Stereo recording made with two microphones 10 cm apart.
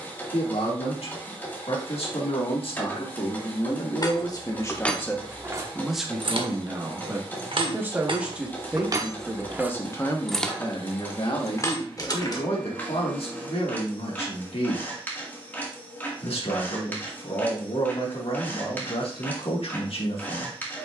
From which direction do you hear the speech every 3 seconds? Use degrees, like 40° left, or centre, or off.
80° left, 40° left, 10° right, 40° left, 70° left, 80° left, 80° left.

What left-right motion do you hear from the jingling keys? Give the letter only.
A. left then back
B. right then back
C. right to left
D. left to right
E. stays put
B.